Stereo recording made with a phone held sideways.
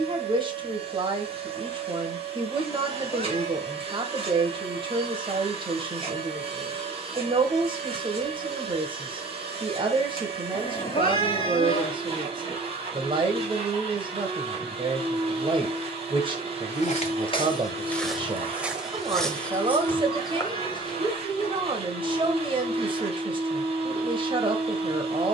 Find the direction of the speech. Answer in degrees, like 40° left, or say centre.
30° right.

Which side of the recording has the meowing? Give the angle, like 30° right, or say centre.
30° left.